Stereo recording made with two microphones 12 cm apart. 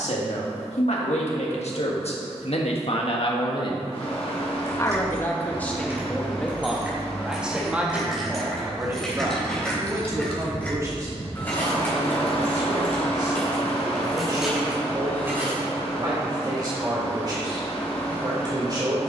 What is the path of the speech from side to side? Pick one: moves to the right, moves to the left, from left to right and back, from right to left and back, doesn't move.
moves to the right.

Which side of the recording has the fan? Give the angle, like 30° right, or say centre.
60° left.